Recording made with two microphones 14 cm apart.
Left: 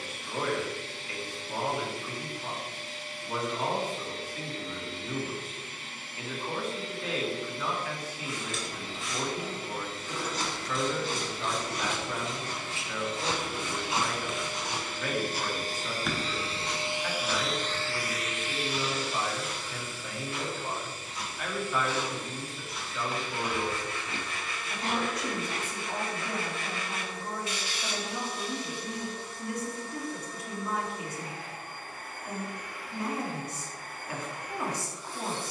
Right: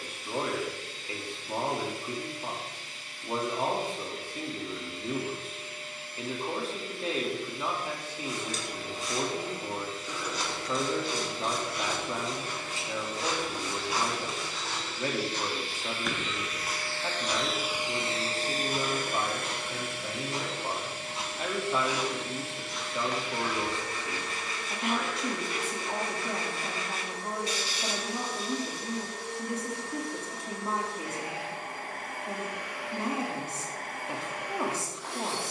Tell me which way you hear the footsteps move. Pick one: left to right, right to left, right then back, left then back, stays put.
right then back.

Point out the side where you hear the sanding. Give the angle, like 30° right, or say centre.
40° right.